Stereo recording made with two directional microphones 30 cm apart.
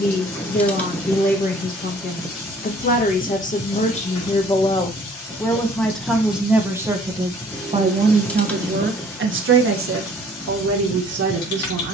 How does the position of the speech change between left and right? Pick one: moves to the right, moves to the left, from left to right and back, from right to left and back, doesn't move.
moves to the right.